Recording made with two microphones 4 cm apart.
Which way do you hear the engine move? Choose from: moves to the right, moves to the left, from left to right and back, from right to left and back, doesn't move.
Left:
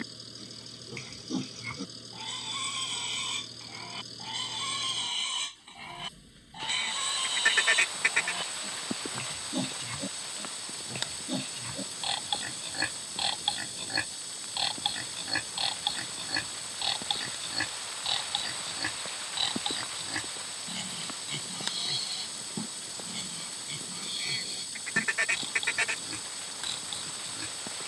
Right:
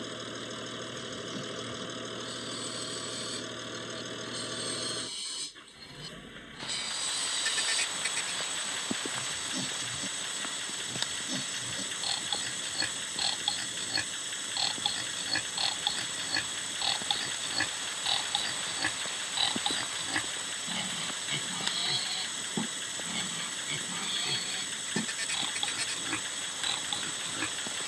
doesn't move.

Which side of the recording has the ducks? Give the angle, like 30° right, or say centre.
50° left.